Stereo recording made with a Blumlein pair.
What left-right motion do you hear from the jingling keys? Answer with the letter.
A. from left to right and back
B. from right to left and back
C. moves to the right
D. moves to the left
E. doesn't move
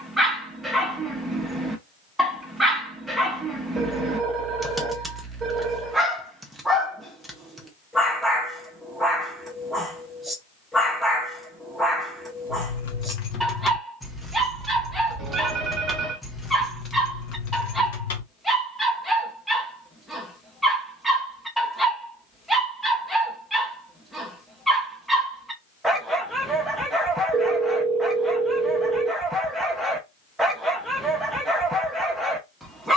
A.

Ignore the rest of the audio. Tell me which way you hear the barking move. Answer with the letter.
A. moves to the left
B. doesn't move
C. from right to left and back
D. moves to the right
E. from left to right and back
B.